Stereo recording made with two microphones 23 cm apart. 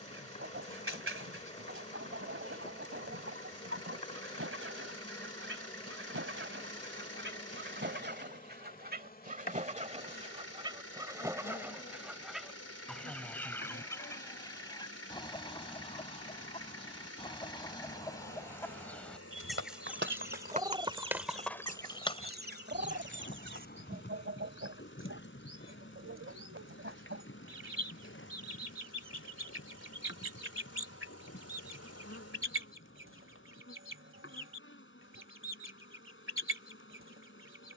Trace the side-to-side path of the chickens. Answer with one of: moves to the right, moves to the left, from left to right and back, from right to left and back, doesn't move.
from right to left and back.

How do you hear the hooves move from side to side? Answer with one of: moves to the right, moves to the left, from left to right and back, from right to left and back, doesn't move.
moves to the left.